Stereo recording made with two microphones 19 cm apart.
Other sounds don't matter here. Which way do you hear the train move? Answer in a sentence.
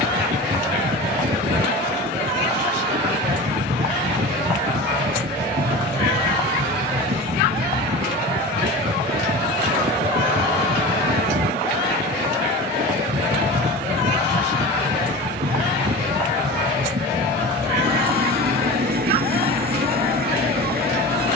In this clip you hear the train stay in one place.